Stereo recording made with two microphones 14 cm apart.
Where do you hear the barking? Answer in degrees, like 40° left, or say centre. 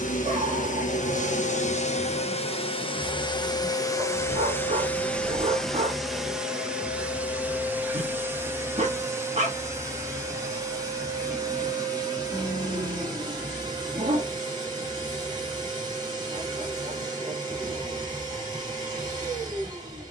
60° right.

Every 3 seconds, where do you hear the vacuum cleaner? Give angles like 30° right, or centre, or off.
60° left, 20° left, 10° right, 30° right, 30° right, 30° right, 30° right.